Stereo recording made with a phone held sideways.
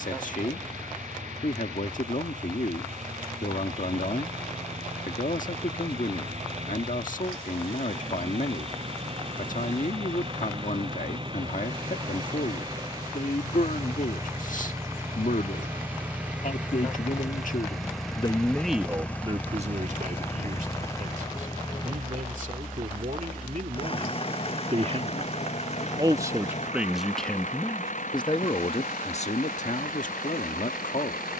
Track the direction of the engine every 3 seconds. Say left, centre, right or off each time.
right, right, right, right, right, centre, centre, left, left, left, left.